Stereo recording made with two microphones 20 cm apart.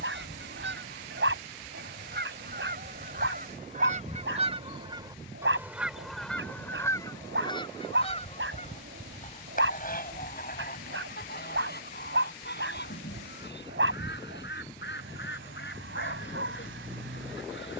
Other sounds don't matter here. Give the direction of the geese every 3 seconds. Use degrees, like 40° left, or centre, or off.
60° right, 30° right, 20° left, 50° left, 60° left, 70° left.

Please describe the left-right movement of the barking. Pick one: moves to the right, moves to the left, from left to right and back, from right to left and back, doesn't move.
doesn't move.